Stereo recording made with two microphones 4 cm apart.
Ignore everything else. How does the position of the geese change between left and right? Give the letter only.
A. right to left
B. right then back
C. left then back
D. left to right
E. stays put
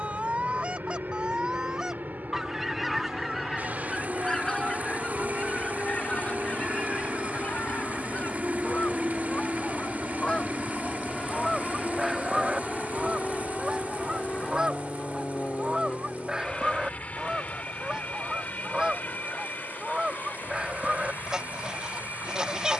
C.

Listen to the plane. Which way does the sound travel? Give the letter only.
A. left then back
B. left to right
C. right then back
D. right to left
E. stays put
D.